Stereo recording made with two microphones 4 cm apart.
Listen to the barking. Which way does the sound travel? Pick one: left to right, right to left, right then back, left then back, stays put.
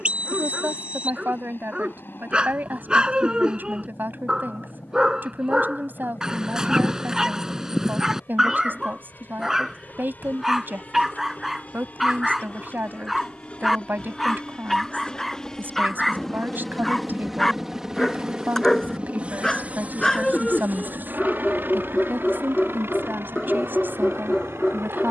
right to left.